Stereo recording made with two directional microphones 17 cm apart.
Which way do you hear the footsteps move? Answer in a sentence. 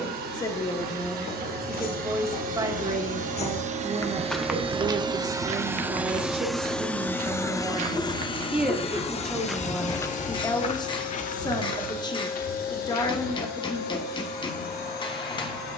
You can hear the footsteps go right and come back.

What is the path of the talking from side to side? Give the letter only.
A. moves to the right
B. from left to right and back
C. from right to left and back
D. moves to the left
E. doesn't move
B.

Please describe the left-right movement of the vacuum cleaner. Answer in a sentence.
In this clip you hear the vacuum cleaner go from the right side to the left.